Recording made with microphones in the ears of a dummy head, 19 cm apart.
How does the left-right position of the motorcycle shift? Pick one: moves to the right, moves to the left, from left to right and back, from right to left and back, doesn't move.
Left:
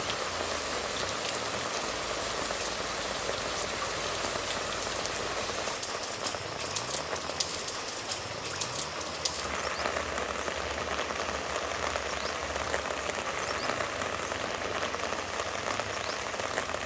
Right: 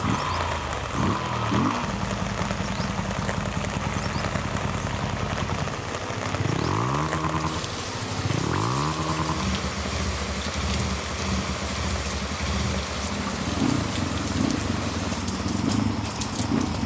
doesn't move.